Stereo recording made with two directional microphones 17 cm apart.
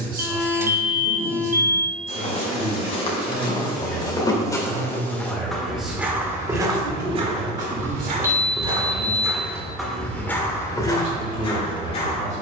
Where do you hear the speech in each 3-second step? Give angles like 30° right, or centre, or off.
40° right, centre, 20° right, 40° right.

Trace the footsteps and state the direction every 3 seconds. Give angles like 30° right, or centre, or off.
40° left, 20° left, 30° right, 10° left.